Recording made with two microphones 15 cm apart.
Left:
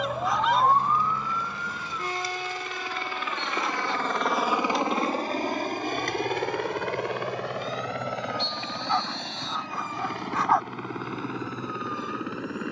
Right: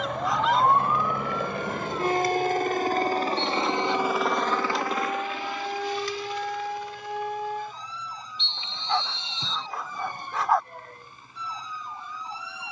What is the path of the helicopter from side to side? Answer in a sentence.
You can hear the helicopter move to the left.